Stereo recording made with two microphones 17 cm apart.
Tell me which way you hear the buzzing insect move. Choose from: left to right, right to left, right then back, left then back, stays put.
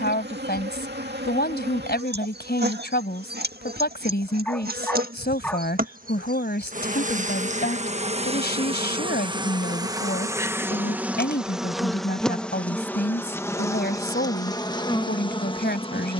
right to left.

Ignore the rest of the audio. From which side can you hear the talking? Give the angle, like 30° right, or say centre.
70° left.